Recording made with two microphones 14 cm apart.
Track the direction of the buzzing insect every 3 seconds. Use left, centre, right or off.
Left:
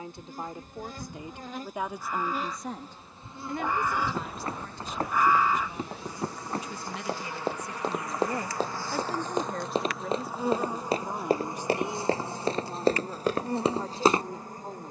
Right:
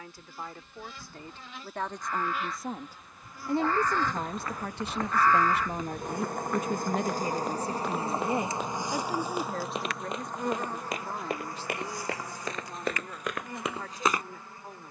left, centre, right, centre, left.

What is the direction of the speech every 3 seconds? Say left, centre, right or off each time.
centre, right, right, centre, left.